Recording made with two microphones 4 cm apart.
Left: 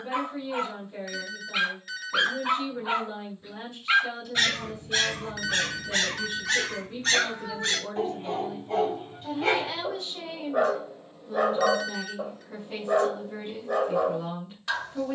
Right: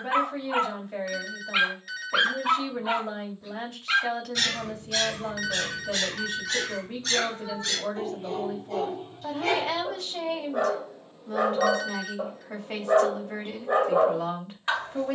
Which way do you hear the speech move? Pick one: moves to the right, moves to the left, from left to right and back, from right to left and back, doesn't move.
doesn't move.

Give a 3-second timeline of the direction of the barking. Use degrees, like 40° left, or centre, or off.
20° right, 30° left, 30° left, 10° left, 20° right.